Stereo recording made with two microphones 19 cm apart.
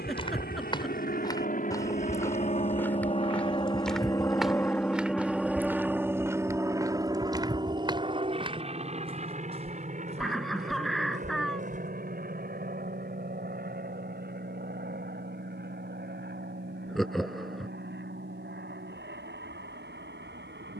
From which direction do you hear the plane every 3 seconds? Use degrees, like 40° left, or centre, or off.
50° left, 10° left, 20° right, 40° right, 50° right, 60° right, 60° right.